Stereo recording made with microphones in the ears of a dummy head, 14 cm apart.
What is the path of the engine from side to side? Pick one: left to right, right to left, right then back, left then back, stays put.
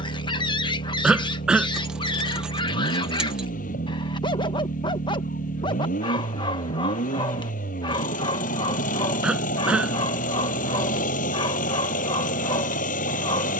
stays put.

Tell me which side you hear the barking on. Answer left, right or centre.
left.